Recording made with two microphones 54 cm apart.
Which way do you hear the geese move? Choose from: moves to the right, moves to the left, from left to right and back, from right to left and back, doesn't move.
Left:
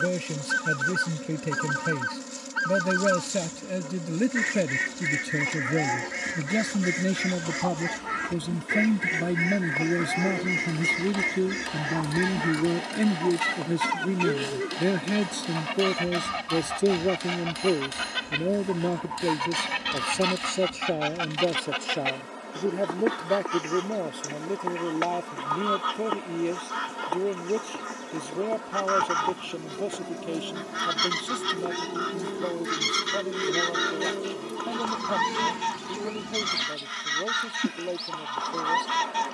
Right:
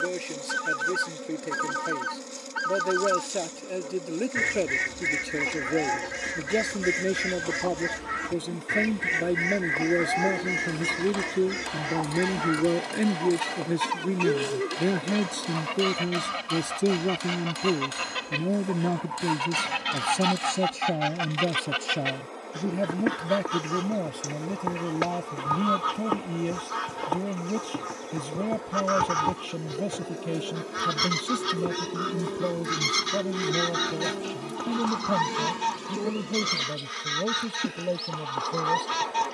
from right to left and back.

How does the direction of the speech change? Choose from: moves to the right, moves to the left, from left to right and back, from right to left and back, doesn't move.
moves to the right.